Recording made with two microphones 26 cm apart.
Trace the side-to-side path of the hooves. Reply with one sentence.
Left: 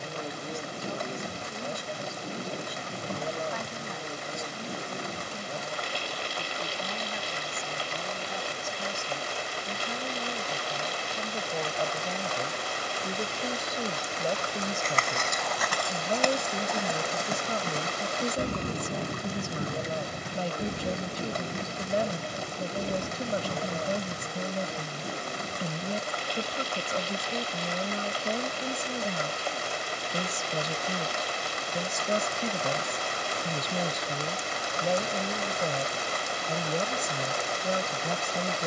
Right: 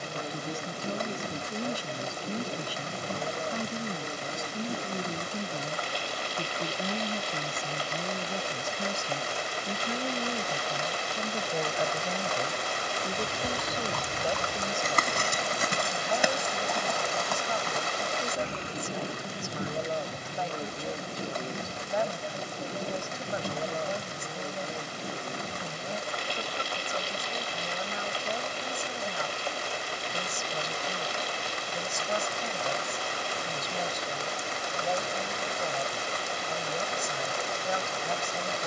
You can hear the hooves travel towards the left.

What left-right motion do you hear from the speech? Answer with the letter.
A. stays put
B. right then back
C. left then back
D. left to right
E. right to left
E.